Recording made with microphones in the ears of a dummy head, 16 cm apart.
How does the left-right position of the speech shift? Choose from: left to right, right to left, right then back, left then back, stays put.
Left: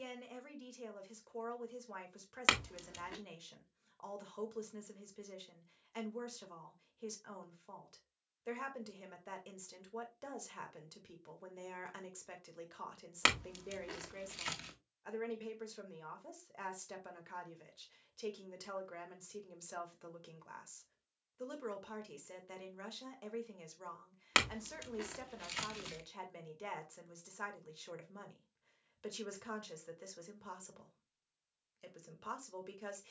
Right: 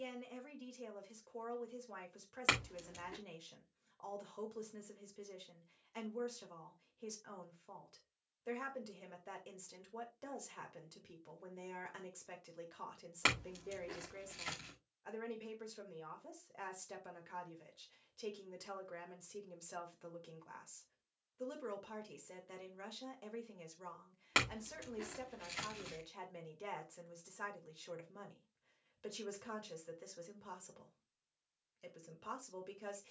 stays put.